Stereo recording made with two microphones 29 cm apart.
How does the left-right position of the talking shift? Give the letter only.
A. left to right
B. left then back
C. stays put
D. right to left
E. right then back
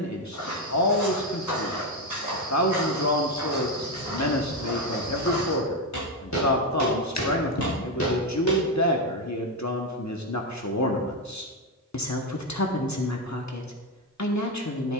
C.